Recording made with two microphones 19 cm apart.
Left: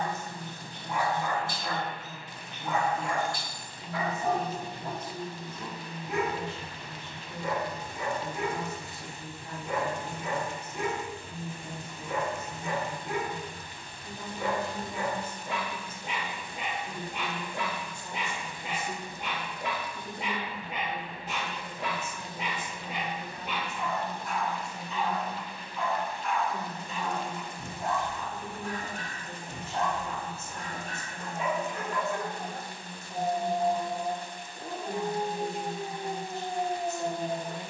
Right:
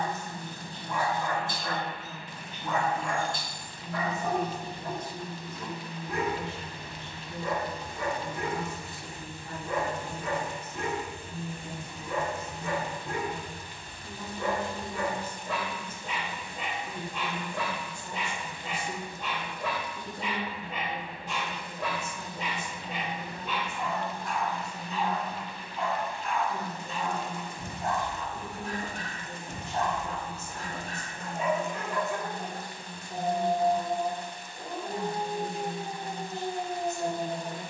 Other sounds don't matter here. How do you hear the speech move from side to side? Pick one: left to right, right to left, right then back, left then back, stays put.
right then back.